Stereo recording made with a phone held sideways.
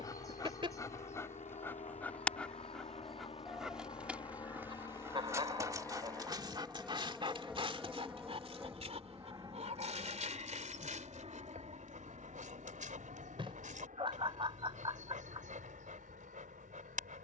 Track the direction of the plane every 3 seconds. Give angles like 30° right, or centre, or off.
50° left, 30° left, centre, 30° right, 50° right, 60° right.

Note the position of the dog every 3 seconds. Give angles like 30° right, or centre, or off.
10° left, 10° right, 30° right, 50° right, 60° right, 60° right.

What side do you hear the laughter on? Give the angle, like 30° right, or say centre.
30° right.